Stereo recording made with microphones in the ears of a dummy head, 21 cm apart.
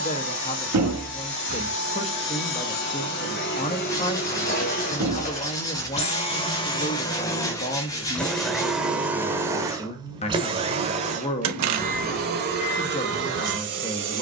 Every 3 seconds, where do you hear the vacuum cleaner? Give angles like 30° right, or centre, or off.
50° left, 40° left, 10° left, 20° right, 50° right.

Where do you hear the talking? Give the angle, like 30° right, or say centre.
30° left.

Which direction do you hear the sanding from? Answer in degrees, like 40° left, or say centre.
20° left.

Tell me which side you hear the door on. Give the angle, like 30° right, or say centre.
80° right.